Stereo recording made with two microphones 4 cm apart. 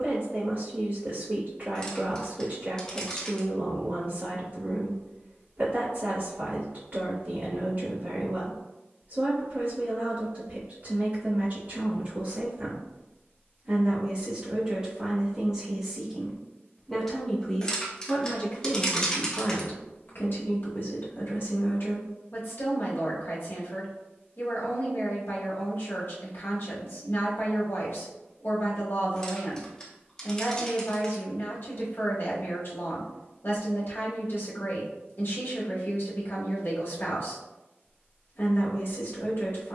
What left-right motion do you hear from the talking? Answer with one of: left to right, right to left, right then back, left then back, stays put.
right to left.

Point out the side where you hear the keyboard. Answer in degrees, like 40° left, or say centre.
20° left.